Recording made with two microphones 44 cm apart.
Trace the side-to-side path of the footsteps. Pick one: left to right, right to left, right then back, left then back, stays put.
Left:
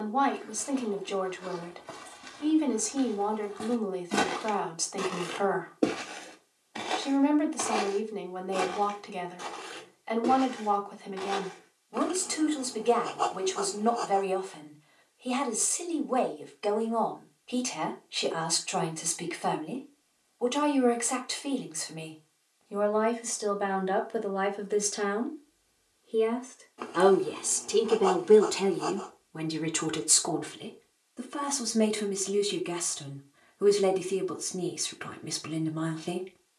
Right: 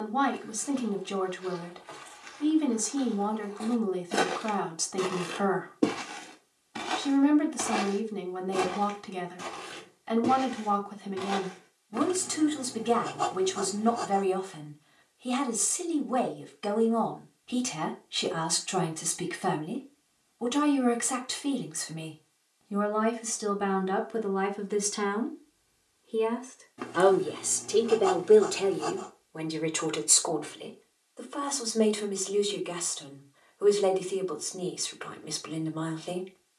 left to right.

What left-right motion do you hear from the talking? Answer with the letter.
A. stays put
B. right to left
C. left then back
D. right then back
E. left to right
B.